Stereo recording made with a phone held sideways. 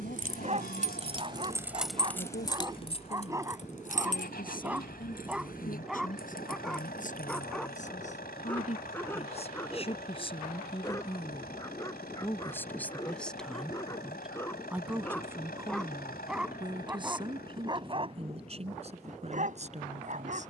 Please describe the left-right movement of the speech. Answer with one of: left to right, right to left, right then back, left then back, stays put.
left to right.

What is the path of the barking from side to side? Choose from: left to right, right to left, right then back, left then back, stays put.
left then back.